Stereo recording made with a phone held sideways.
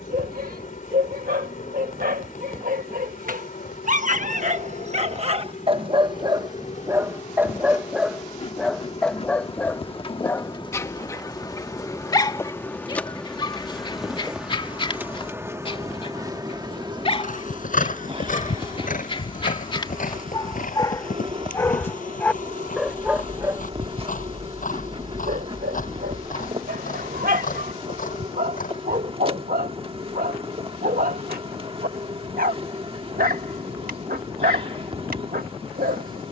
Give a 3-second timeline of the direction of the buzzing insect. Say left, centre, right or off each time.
left, left, left, left, centre, right, right, right, right, right, right, right.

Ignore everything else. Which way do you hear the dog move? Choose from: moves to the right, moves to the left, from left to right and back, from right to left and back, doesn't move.
from right to left and back.